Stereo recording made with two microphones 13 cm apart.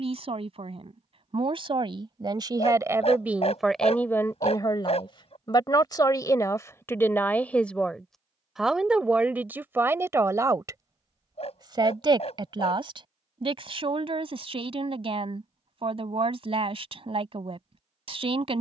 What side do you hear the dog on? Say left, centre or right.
left.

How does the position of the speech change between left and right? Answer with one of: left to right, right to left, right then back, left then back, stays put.
left then back.